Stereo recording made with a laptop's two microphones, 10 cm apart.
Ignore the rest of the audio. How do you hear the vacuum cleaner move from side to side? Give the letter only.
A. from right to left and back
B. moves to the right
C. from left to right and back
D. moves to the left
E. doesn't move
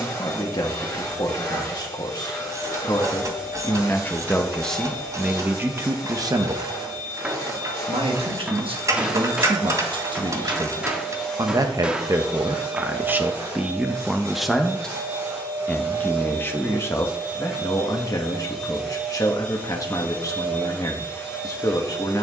C.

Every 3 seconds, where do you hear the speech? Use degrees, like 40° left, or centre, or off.
40° left, 10° left, 50° right, 50° right, 10° right, 20° left, 40° left, 40° left.